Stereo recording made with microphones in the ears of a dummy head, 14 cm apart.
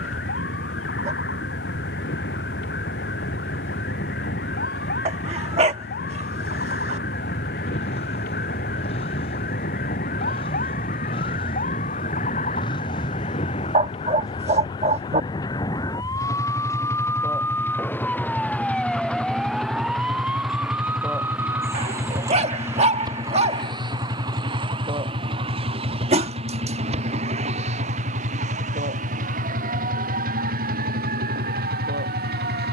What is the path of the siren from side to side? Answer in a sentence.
You can hear the siren travel towards the right.